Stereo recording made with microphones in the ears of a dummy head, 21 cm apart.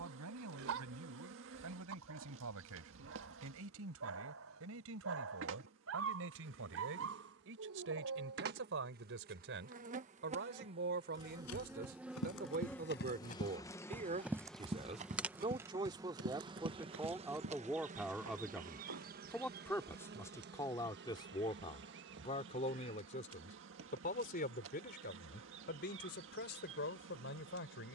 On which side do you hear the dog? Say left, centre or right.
right.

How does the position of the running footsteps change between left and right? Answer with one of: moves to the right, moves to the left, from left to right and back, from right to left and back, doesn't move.
moves to the right.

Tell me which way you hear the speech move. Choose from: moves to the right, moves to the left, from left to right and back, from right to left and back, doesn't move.
moves to the left.